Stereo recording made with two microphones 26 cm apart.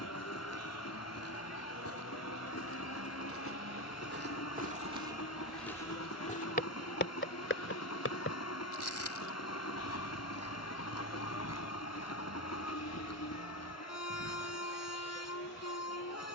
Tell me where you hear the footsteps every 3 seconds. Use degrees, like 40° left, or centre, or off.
70° right, 30° right, 50° left, 70° left, 80° left, off.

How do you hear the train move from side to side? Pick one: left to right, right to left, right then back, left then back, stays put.
stays put.